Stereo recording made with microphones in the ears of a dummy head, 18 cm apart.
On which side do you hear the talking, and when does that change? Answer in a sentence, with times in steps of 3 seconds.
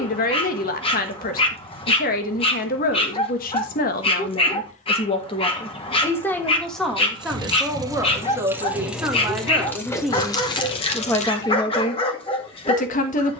In this clip you hear the talking on the left from 0 s, in the centre from 6 s and on the left from 12 s.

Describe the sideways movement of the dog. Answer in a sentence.
In this clip you hear the dog stay put.